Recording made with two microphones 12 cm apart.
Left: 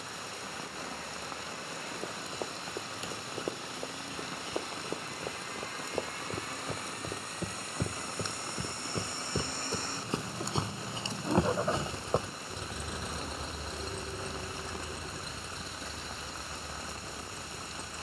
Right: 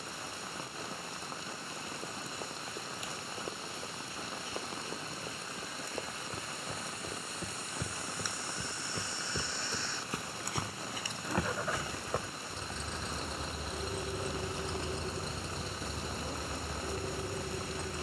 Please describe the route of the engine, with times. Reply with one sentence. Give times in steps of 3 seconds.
In this clip you hear the engine on the left from 0 s, in the centre from 12 s and on the right from 15 s.